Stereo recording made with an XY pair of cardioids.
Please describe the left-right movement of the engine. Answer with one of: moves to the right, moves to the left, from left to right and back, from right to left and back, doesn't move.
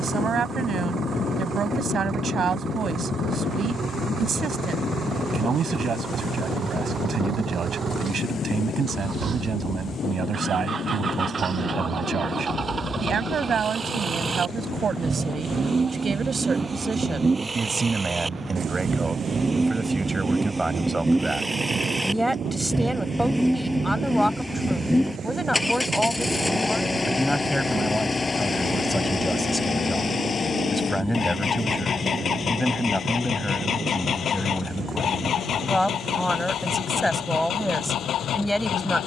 moves to the left.